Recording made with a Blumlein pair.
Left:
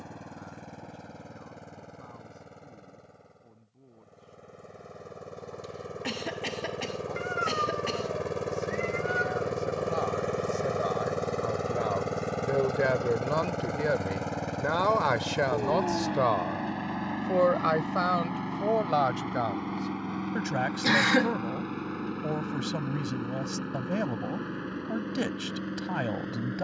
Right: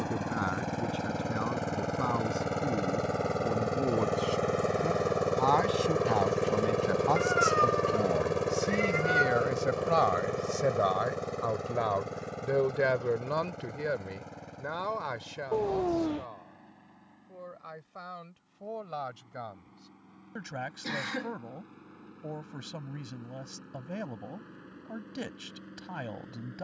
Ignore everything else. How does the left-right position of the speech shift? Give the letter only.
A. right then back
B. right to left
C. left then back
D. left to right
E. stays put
B.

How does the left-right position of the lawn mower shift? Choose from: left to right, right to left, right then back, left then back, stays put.
right to left.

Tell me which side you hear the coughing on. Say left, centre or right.
left.